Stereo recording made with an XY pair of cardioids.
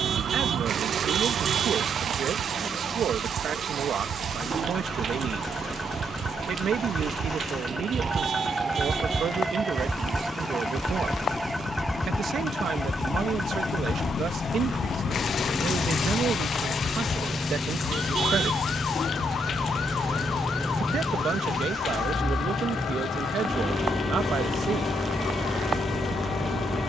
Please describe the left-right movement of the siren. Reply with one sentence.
In this clip you hear the siren travel towards the left.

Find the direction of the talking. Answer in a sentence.
You can hear the talking on the right.